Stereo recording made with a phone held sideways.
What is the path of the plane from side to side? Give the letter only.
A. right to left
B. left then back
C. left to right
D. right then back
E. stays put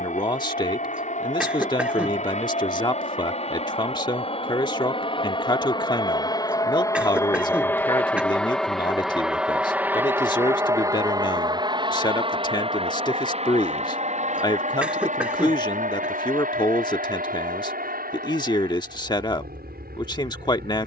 C.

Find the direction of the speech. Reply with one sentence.
In this clip you hear the speech on the left.